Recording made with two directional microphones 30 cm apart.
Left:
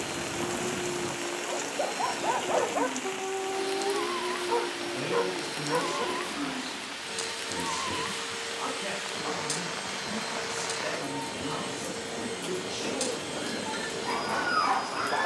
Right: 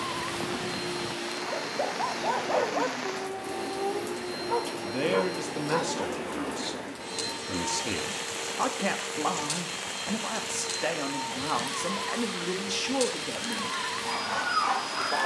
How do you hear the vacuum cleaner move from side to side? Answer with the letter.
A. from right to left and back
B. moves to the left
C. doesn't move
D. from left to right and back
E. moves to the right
C.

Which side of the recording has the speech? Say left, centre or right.
right.